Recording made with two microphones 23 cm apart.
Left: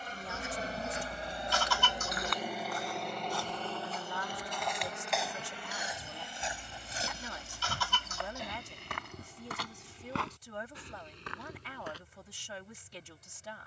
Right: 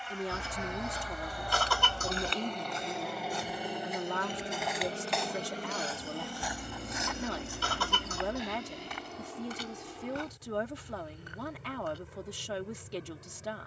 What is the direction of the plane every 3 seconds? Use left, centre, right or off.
left, right, right, right, right.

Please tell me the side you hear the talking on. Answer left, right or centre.
right.